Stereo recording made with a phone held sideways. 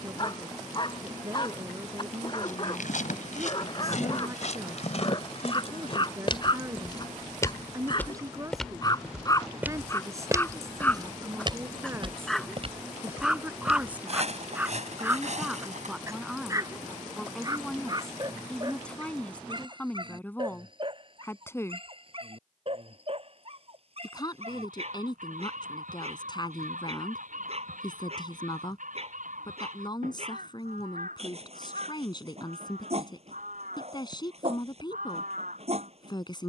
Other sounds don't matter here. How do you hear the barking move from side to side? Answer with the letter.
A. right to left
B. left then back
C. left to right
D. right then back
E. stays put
C.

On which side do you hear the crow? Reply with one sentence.
You can hear the crow on the right.